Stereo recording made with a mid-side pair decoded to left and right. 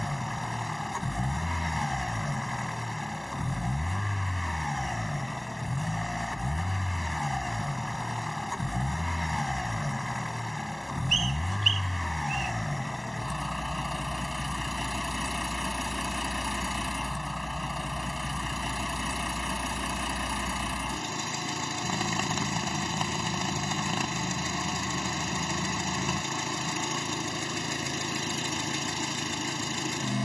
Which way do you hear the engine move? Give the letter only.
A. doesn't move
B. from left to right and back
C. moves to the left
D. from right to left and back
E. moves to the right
A.